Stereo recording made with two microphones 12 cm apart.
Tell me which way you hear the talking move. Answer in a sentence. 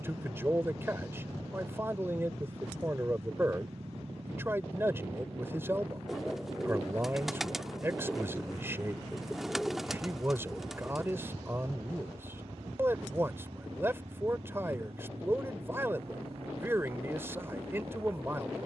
In this clip you hear the talking stay in one place.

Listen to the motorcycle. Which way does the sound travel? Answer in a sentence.
In this clip you hear the motorcycle stay in one place.